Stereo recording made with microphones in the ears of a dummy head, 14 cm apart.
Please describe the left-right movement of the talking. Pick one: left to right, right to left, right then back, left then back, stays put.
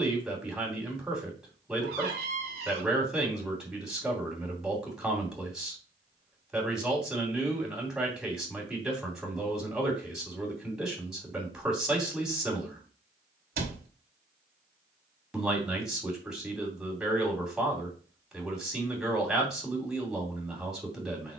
stays put.